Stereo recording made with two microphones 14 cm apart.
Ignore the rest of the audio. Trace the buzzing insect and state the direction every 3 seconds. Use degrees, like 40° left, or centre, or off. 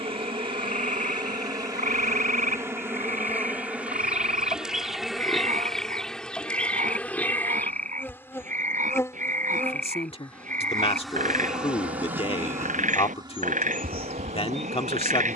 30° right, 10° right, 10° left, 10° left, 30° right.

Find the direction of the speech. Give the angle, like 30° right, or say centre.
40° left.